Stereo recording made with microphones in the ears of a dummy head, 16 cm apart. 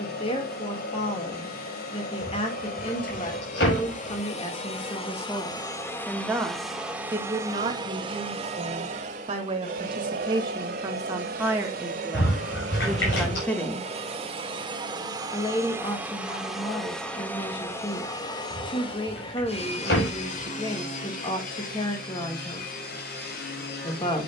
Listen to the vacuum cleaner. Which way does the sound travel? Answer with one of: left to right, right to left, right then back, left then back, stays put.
right then back.